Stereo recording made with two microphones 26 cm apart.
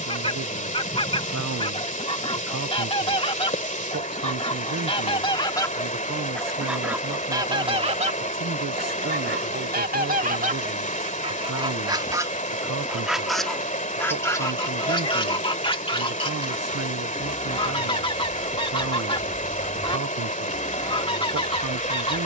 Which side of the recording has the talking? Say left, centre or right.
right.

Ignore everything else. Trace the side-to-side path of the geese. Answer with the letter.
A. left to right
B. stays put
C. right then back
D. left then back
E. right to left
C.